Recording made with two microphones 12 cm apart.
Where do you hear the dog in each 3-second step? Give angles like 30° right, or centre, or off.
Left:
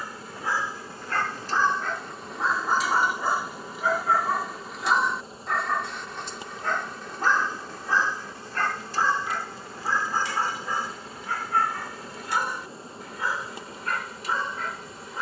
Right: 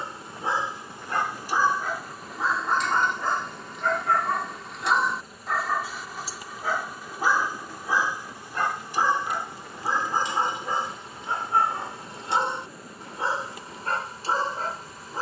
10° right, centre, 10° right, 20° right, 30° right.